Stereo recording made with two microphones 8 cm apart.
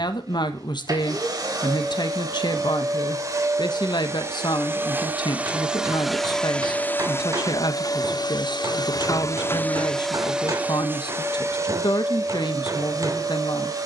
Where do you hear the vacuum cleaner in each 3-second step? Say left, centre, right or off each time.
right, right, left, centre, right.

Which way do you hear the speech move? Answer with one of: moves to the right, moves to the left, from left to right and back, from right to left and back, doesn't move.
doesn't move.